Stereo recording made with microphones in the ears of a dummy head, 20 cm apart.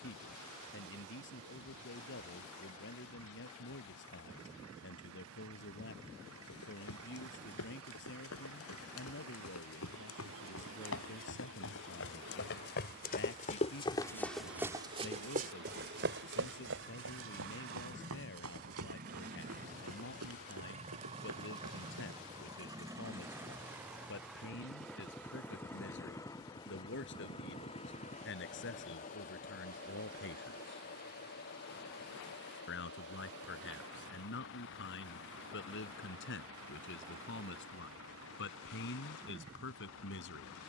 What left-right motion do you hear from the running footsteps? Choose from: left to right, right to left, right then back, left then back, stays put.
left to right.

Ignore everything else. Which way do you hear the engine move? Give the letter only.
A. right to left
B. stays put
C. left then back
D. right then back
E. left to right
A.